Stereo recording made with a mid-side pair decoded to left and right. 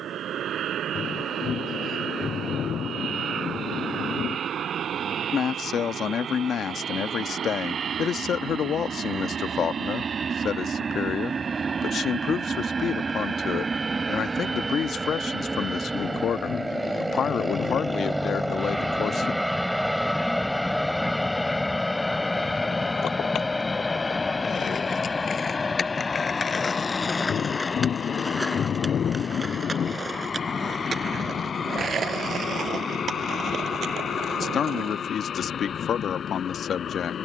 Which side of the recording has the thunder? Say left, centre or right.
left.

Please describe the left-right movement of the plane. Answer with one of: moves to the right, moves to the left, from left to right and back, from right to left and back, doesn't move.
moves to the left.